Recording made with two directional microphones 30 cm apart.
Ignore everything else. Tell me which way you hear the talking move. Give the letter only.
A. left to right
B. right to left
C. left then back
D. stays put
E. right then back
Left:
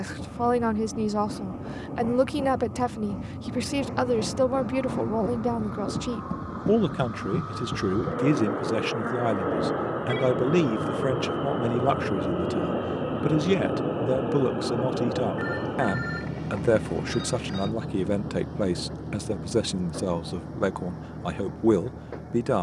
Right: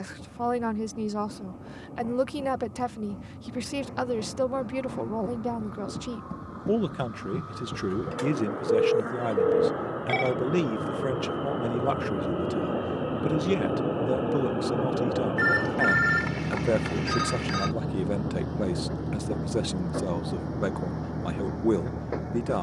D.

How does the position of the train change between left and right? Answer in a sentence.
You can hear the train move from left to right.